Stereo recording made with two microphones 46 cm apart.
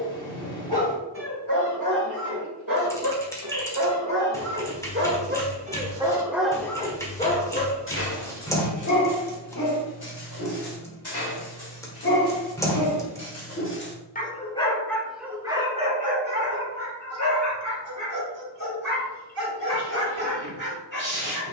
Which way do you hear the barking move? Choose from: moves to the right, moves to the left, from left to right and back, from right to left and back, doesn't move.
from right to left and back.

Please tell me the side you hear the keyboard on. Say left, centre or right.
centre.